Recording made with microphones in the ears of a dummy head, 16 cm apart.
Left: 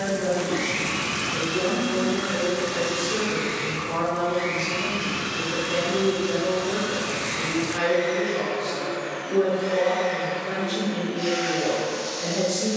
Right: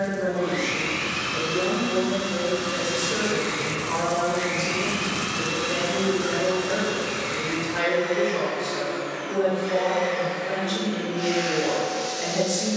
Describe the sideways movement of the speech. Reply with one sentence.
In this clip you hear the speech stay in one place.